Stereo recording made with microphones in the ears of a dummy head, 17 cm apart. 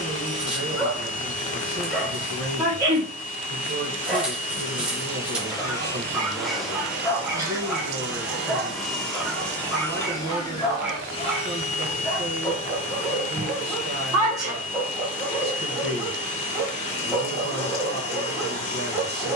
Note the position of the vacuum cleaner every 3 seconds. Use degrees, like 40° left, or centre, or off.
40° left, 30° left, 10° right, 20° left, 40° left, 40° left, 40° left.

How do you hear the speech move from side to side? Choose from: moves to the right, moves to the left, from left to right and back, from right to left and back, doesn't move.
doesn't move.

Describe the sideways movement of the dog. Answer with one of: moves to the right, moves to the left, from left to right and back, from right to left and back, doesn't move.
doesn't move.